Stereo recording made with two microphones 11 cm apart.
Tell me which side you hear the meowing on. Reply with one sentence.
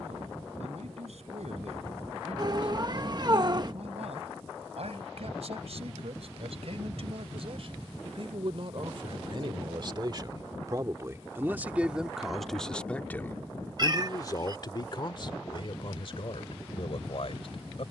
You can hear the meowing on the right.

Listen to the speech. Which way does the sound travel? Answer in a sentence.
You can hear the speech travel towards the left.